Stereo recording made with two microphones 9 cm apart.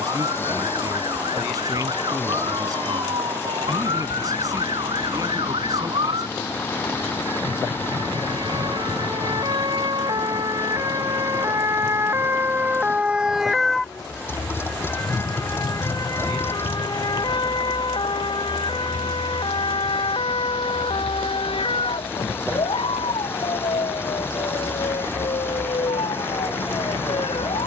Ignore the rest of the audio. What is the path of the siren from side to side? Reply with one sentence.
You can hear the siren travel towards the left.